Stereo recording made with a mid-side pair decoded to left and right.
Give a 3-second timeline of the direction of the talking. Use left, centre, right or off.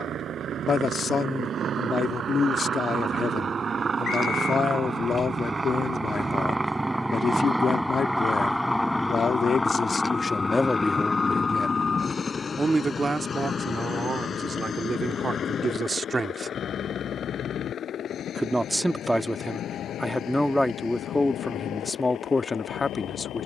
left, left, left, left, right, right, centre, left.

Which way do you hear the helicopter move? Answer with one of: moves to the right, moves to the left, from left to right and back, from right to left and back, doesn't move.
moves to the left.